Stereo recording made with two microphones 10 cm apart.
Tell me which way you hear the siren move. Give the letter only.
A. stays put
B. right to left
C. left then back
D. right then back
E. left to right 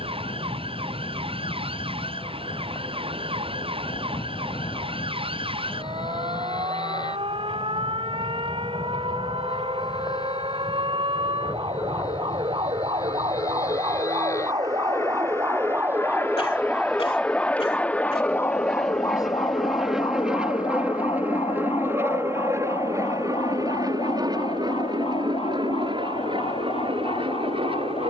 B.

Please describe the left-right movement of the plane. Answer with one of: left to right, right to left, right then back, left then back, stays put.
left to right.